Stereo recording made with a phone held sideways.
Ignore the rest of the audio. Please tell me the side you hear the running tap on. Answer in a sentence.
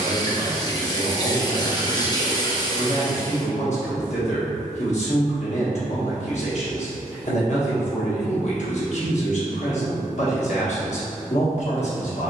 You can hear the running tap on the left.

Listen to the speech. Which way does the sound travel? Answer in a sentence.
In this clip you hear the speech stay put.